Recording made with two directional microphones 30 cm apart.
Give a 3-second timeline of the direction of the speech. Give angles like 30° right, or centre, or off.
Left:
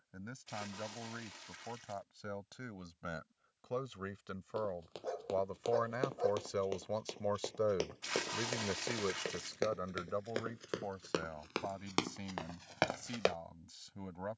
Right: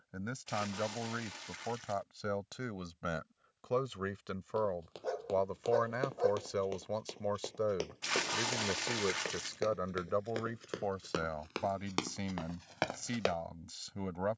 50° right, 30° right, centre, 30° right, 50° right.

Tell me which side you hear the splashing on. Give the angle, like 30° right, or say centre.
30° right.